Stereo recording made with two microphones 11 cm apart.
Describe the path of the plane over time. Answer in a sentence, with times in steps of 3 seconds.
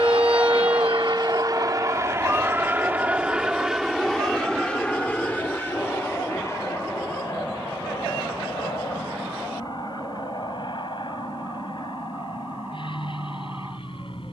You can hear the plane on the right from 0 s, in the centre from 3 s and on the left from 6 s.